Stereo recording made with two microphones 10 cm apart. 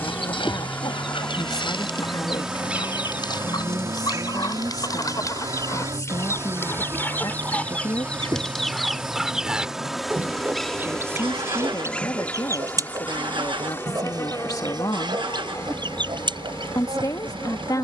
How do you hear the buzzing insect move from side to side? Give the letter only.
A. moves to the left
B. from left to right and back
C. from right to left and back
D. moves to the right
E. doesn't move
B.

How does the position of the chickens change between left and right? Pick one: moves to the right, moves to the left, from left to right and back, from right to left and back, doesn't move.
moves to the right.